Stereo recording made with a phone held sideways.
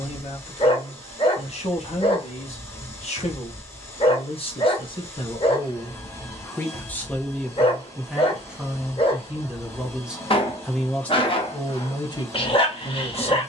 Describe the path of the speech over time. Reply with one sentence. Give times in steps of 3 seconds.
In this clip you hear the speech on the left from 0 s, in the centre from 6 s and on the left from 12 s.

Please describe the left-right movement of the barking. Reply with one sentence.
You can hear the barking stay put.